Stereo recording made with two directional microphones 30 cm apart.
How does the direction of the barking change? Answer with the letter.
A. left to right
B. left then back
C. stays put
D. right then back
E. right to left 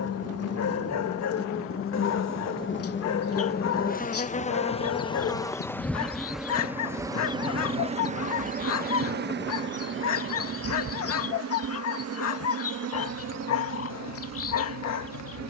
C.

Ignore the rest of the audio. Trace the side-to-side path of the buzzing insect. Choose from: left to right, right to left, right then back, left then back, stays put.
left to right.